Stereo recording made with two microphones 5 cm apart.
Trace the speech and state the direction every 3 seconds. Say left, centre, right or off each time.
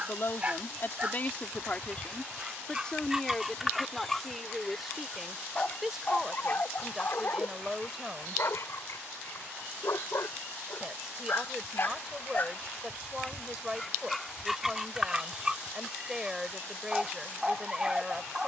left, centre, centre, centre, centre, centre.